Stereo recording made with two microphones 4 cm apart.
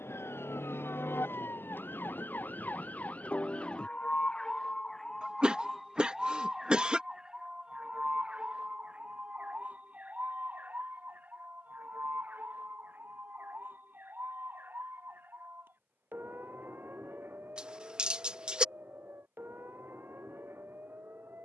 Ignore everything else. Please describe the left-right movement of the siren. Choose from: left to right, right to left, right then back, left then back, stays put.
left to right.